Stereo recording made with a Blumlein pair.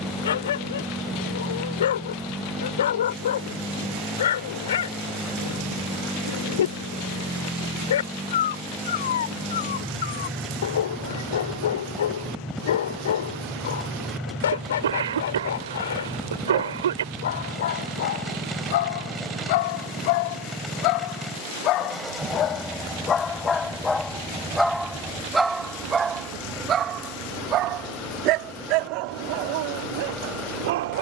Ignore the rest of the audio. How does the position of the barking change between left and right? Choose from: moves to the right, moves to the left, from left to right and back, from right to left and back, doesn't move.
moves to the right.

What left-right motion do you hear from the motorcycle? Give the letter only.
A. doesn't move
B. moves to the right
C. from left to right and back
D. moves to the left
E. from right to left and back
A.